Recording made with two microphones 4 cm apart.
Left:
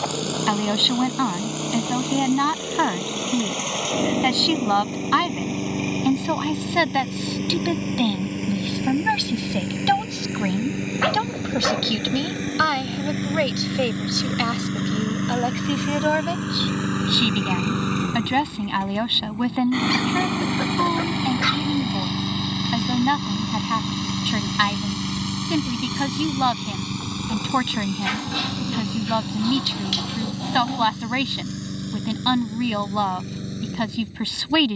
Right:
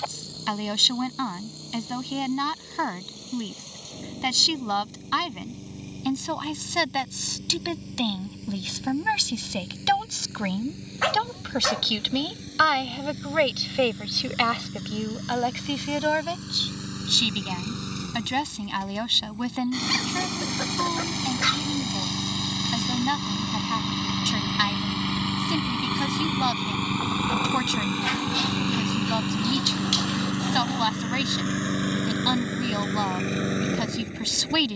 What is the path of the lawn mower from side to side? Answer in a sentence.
In this clip you hear the lawn mower move to the right.